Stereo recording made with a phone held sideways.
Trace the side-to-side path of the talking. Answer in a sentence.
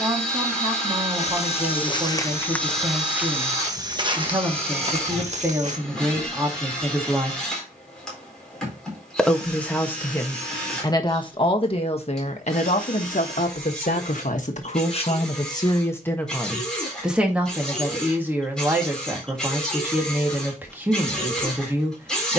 You can hear the talking move from right to left and back again.